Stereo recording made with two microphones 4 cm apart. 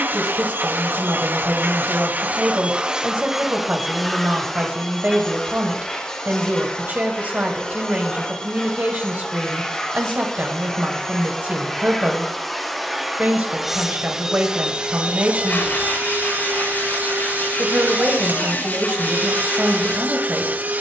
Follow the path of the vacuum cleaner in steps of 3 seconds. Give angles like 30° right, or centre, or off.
40° right, centre, 20° left, 10° left, 10° right, 40° right, 40° right.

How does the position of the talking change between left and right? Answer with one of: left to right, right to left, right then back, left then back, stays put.
stays put.